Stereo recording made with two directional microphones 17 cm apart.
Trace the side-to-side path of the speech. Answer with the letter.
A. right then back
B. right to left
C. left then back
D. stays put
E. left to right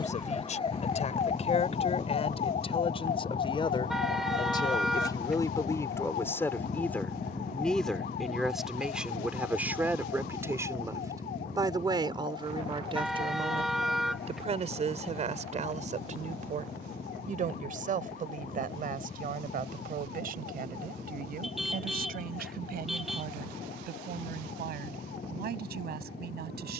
E.